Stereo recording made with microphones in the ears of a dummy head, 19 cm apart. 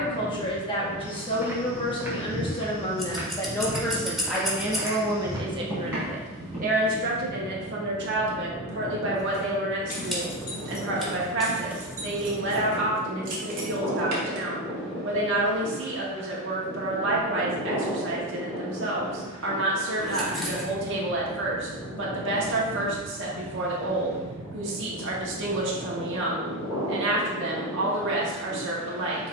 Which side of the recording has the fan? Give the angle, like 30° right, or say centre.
20° right.